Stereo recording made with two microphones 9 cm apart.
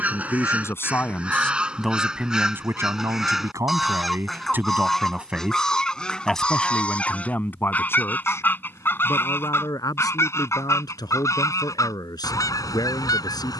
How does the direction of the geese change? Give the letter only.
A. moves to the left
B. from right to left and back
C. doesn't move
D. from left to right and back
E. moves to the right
A.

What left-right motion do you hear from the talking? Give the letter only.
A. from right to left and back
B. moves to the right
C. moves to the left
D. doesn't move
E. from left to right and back
E.